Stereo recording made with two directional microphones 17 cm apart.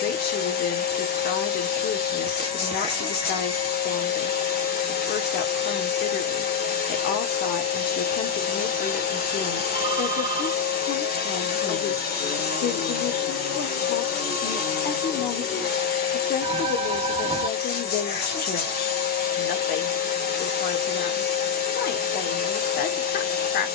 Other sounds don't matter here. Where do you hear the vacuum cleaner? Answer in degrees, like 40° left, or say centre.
70° left.